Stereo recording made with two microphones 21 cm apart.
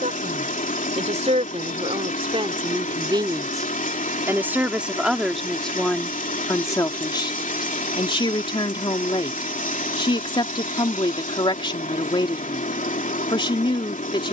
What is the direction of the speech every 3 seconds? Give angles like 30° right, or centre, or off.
30° right, 10° right, 20° left, 20° left, 20° left.